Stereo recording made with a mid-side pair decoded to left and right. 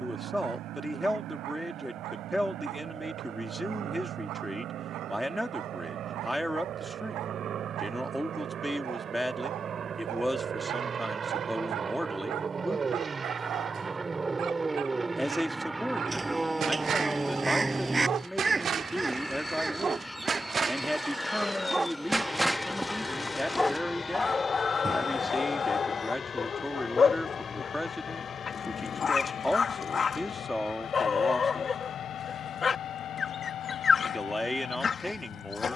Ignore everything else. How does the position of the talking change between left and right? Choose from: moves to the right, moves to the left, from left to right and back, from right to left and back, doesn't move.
doesn't move.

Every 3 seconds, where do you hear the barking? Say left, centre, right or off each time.
right, right, right, right, right, right, right, centre, left, left, left, left.